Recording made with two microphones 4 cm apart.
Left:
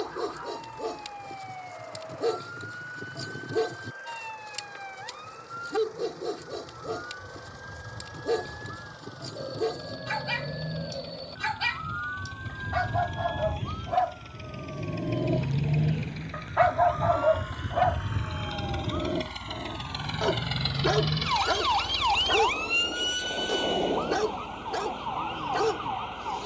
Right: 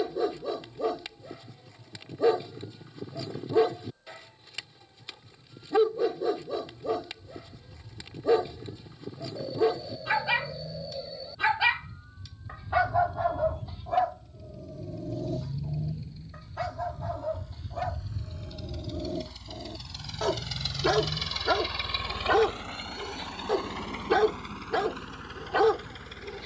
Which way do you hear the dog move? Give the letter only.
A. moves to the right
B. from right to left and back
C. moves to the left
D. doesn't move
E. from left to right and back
B.